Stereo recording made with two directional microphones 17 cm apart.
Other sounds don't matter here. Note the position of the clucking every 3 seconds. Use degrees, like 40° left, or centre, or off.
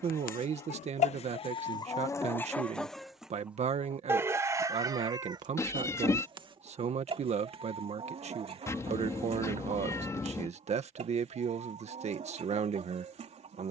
30° left, 20° right, 30° right, 40° right, 40° right.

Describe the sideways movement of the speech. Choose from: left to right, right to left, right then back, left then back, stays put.
stays put.